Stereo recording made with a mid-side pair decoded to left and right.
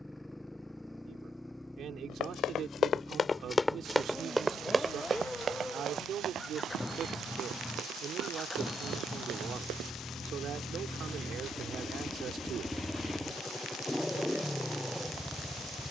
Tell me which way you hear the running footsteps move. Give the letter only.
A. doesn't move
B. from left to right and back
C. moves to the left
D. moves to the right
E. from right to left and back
D.